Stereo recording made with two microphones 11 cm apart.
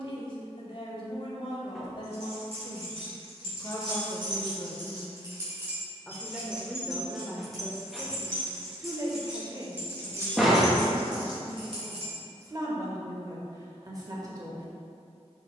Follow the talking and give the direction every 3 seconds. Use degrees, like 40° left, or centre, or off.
50° left, 30° left, 10° right, 30° right, 30° right.